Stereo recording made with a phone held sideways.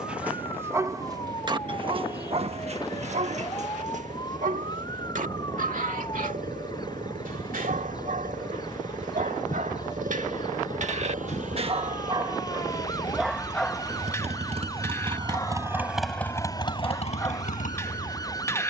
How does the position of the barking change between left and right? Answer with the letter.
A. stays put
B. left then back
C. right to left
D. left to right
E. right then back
E.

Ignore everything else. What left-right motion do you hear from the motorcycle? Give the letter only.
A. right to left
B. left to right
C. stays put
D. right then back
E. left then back
A.